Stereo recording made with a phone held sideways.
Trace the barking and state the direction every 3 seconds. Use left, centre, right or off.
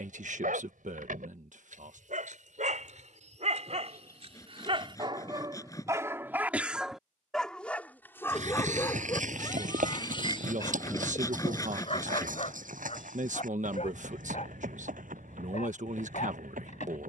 right, right, centre, left, left, left.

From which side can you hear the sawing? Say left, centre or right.
left.